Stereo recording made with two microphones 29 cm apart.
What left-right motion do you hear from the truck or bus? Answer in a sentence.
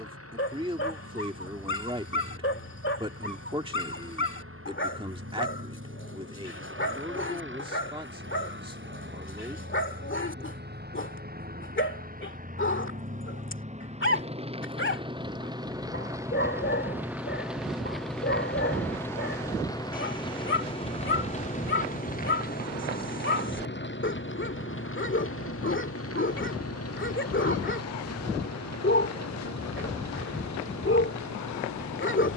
You can hear the truck or bus move to the left.